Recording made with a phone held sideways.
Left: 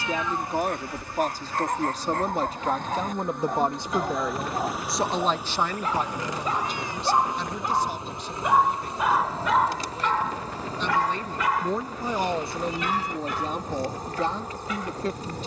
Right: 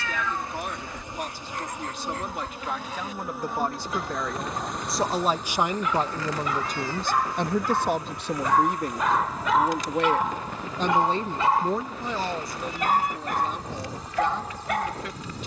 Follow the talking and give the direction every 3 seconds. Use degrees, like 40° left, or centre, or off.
40° left, 10° left, 50° right, 40° right, 30° left.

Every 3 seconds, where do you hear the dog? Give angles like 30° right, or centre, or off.
50° left, 40° left, 20° left, 10° right, 60° right.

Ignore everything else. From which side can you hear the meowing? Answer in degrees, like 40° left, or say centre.
20° left.